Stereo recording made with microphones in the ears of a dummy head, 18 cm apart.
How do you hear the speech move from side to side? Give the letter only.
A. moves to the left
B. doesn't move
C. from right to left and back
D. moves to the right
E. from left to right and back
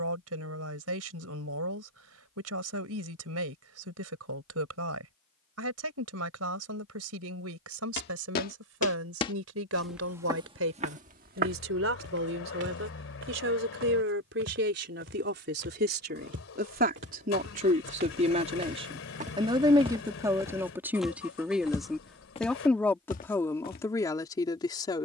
A.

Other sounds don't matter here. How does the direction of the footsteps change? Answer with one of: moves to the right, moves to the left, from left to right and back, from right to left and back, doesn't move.
from left to right and back.